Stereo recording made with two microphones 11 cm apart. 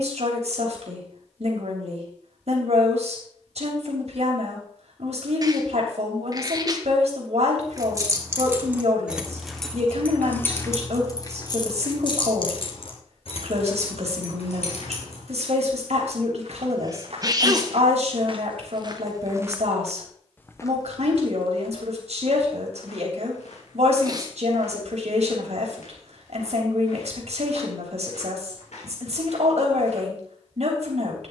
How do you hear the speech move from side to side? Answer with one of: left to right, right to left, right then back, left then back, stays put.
stays put.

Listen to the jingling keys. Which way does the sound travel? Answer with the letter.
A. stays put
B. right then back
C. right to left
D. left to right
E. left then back
C.